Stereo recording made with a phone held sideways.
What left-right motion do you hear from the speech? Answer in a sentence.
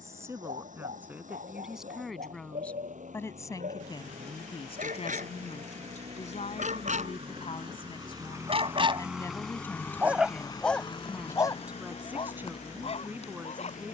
You can hear the speech go left and come back.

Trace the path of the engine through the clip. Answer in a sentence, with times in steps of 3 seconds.
In this clip you hear the engine on the right from 0 s and on the left from 9 s.